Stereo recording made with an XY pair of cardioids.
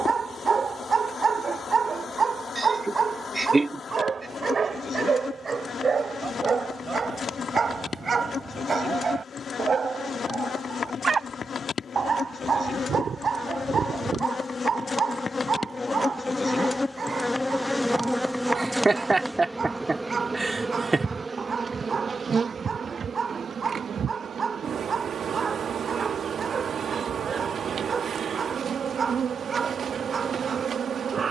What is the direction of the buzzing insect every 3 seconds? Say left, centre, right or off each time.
left, left, left, left, left, left, centre, right, right, right, right.